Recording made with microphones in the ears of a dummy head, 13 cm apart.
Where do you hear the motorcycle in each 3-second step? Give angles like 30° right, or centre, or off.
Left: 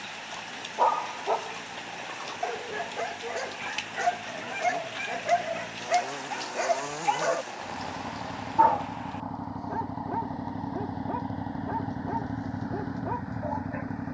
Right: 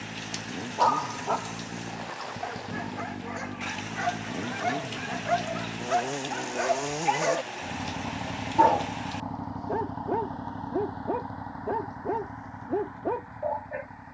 50° right, 40° right, 20° right, 10° left, 50° left.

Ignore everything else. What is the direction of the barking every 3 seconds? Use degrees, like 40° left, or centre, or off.
30° left, 30° left, 10° right, 40° right, 40° right.